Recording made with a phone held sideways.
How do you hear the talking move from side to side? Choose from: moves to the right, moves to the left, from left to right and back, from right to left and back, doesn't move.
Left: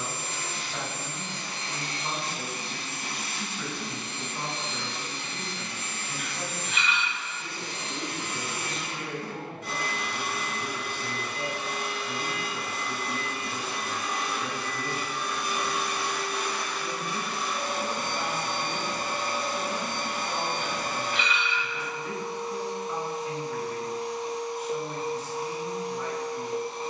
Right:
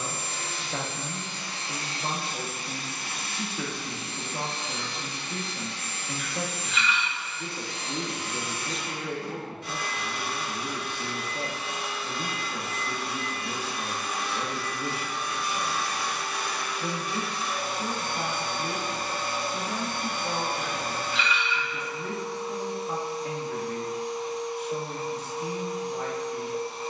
doesn't move.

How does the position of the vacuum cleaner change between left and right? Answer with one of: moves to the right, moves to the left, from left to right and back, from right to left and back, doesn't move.
doesn't move.